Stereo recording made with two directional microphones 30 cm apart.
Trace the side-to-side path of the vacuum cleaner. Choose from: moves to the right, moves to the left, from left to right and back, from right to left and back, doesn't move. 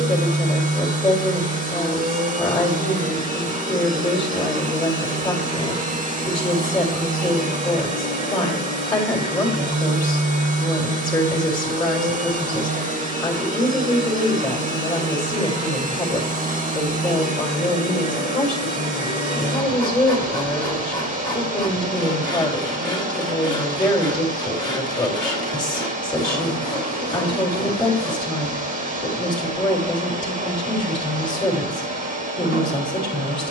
doesn't move.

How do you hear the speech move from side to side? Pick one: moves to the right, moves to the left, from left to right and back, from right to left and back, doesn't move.
doesn't move.